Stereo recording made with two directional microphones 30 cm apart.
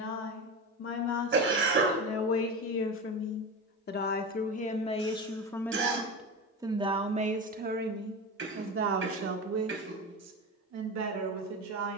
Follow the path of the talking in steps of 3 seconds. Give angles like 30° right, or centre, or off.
50° left, 20° left, 30° right, 60° right.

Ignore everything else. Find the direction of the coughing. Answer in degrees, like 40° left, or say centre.
40° right.